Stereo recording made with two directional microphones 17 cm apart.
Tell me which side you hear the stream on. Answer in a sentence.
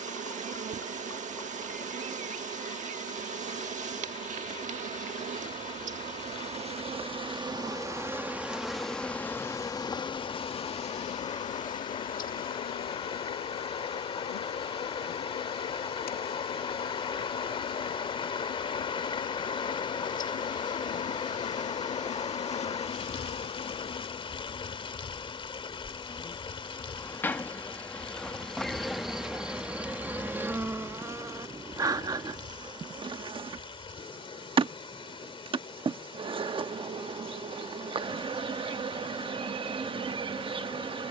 In this clip you hear the stream on the left.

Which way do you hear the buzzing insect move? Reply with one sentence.
You can hear the buzzing insect move from right to left and back again.